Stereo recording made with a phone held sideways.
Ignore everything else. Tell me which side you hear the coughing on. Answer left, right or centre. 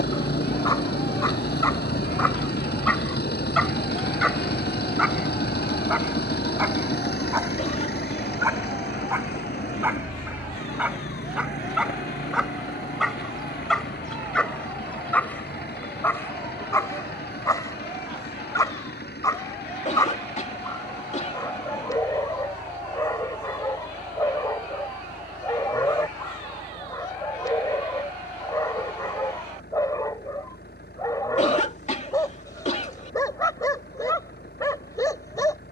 left.